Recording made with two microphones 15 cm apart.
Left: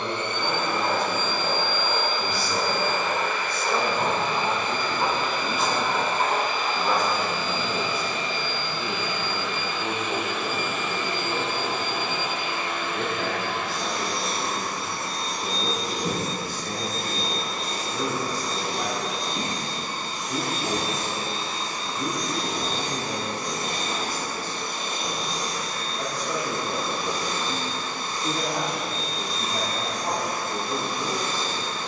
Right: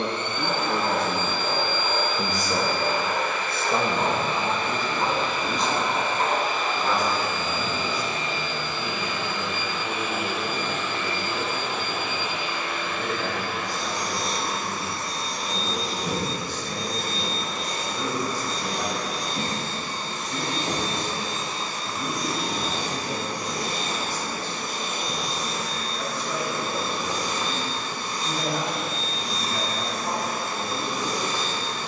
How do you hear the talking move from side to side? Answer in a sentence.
You can hear the talking move to the left.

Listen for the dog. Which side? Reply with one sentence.
You can hear the dog in the centre.